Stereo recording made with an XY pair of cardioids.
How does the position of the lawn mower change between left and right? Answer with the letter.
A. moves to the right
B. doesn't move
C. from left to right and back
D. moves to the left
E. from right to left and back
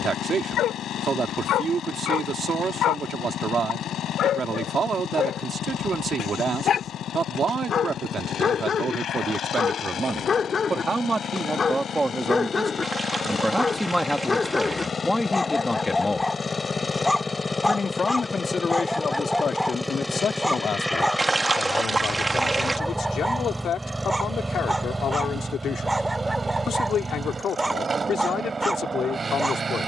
A.